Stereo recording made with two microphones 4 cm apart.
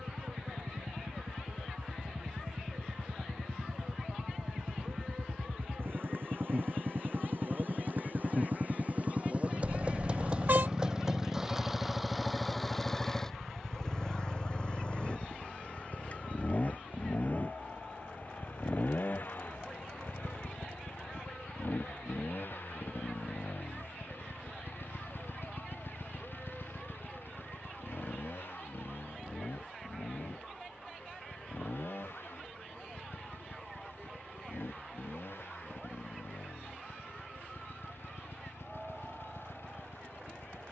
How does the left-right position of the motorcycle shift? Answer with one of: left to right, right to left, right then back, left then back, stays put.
right to left.